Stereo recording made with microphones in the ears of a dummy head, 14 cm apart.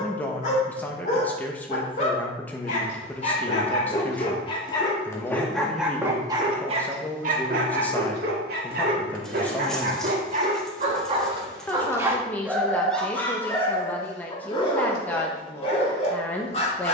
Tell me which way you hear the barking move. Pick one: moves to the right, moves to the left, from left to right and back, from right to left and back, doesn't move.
from left to right and back.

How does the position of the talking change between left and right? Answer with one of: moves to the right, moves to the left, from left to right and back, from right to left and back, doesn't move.
doesn't move.